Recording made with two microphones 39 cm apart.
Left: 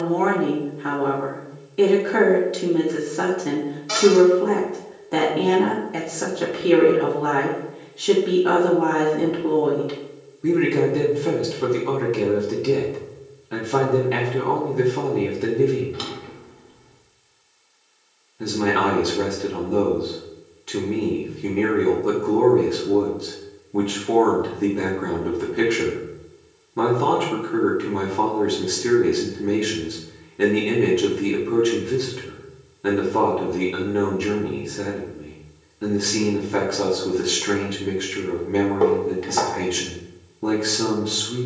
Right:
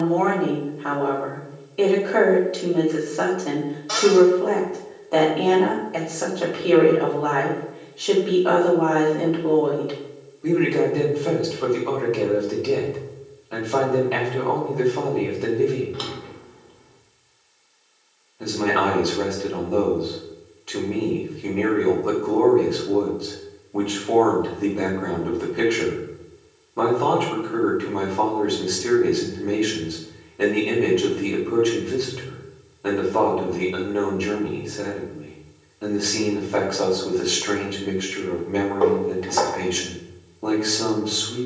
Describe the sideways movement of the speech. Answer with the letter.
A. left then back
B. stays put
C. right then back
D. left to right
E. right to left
B.